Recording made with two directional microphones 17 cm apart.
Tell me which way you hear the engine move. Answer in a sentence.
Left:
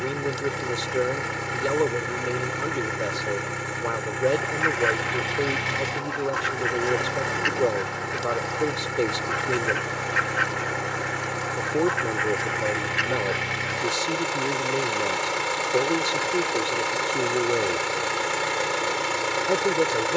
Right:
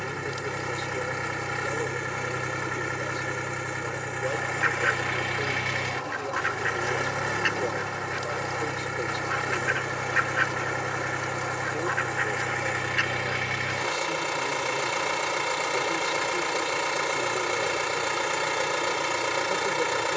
You can hear the engine stay in one place.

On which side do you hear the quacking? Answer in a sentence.
In this clip you hear the quacking in the centre.